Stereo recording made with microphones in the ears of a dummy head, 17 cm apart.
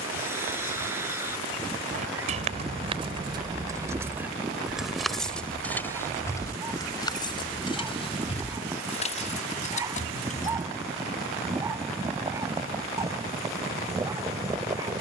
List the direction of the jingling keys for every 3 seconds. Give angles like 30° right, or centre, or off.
40° right, 10° right, 20° left, 40° left, off.